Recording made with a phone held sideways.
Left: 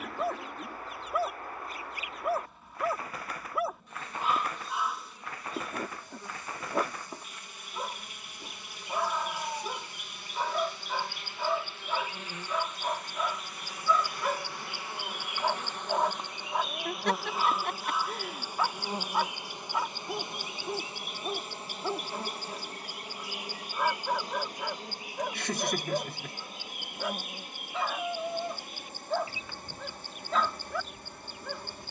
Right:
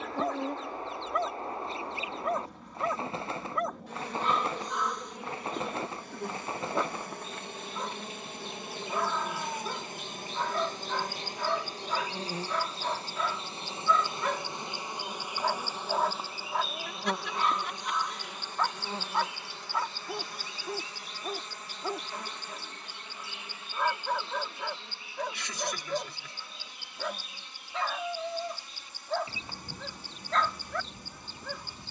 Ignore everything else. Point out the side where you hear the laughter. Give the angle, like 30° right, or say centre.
50° left.